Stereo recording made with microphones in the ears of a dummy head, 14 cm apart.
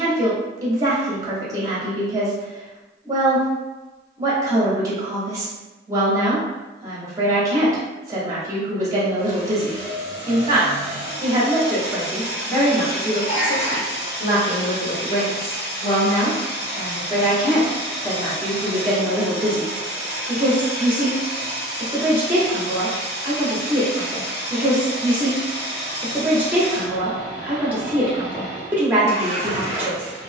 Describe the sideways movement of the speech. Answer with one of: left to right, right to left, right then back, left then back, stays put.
left then back.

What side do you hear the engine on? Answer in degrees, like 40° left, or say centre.
60° left.